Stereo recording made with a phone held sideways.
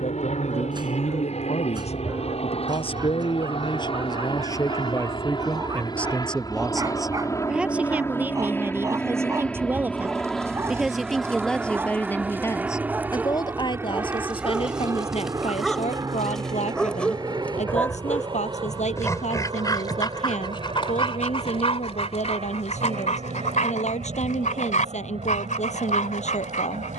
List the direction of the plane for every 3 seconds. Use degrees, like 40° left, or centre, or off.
50° left, 40° left, 20° left, centre, 10° right, 30° right, 30° right, 40° right, 50° right.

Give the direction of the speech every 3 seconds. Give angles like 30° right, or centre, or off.
50° left, 30° left, 10° right, 10° right, 30° left, 50° left, 60° left, 60° left, 60° left.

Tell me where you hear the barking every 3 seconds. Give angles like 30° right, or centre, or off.
30° right, 30° right, 30° right, 20° right, 10° right, centre, 30° left, 50° left, 60° left.